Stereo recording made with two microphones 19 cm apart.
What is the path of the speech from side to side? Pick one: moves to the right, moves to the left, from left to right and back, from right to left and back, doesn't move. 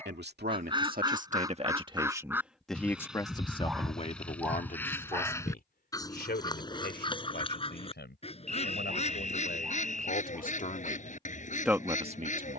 from right to left and back.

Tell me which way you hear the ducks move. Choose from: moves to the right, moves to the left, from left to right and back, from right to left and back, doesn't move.
moves to the left.